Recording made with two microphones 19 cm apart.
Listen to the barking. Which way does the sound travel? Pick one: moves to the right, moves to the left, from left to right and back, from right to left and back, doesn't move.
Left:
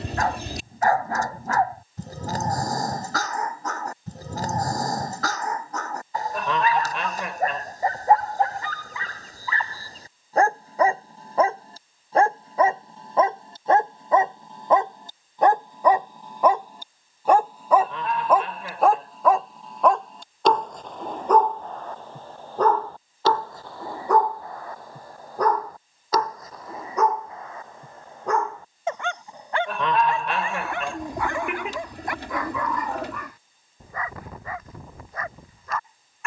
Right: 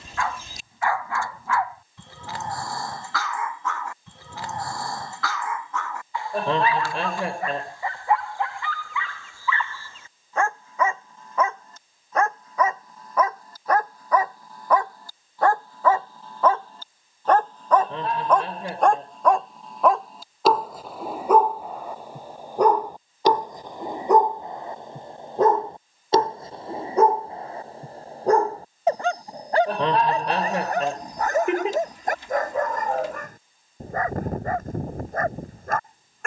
moves to the right.